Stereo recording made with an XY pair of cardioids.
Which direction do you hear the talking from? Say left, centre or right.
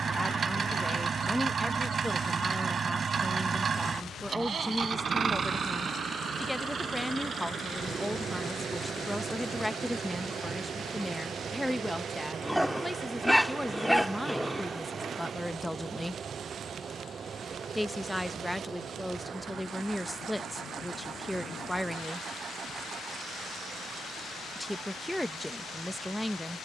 centre.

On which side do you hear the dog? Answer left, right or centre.
centre.